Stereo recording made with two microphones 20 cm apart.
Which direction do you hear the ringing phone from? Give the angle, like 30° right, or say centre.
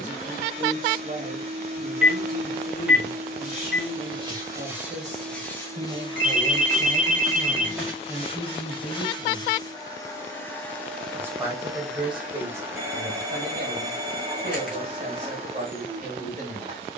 10° right.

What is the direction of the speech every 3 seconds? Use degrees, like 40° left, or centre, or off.
40° right, 40° right, 10° right, 10° right, 40° right, 40° right.